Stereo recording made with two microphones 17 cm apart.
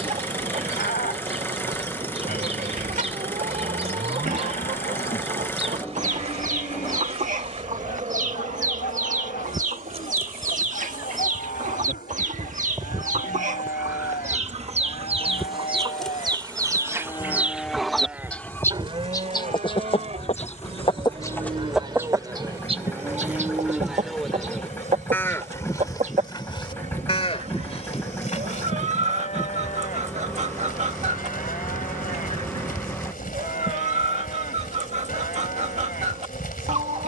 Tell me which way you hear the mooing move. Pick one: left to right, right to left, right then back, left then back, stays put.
right then back.